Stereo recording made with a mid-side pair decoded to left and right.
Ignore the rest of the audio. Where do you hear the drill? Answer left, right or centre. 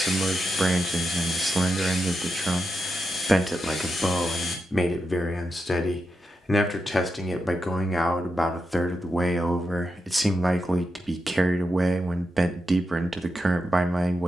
left.